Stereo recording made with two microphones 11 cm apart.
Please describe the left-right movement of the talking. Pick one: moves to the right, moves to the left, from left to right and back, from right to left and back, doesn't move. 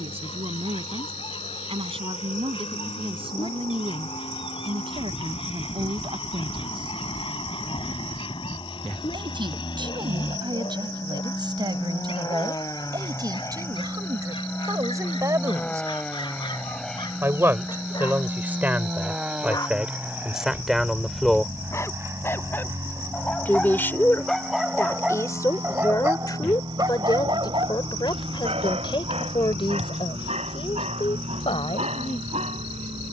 moves to the left.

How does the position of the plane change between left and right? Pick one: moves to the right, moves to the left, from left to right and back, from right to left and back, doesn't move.
moves to the right.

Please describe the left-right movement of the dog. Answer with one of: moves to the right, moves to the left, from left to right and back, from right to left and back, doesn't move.
moves to the right.